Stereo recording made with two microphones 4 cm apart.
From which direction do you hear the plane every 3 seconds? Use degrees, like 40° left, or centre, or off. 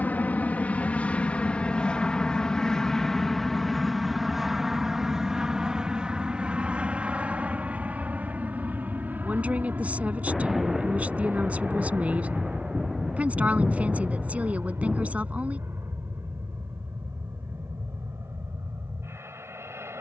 20° left, 10° right, 30° right, 40° right, 50° right, 60° right, 60° right.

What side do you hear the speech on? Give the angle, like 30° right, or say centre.
30° right.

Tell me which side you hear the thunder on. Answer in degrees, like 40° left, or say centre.
10° right.